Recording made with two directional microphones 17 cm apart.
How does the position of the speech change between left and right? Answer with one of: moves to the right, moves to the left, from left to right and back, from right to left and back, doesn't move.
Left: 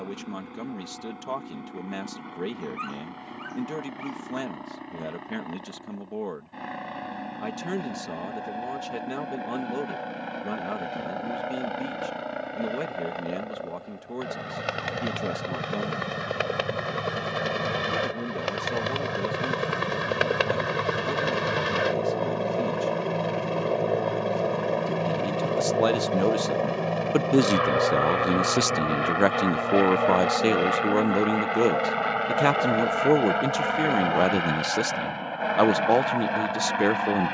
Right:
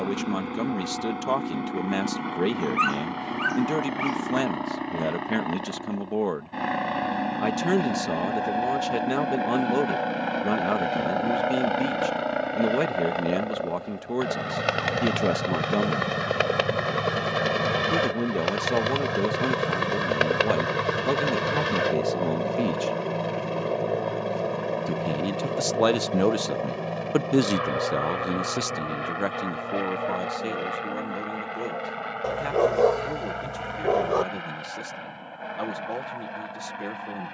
moves to the left.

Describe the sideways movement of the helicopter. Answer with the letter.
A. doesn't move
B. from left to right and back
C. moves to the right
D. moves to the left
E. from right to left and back
D.